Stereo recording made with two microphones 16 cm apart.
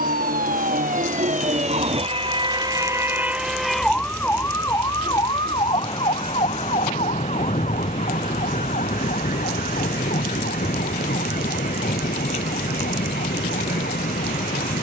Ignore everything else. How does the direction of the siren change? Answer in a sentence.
In this clip you hear the siren go from the right side to the left.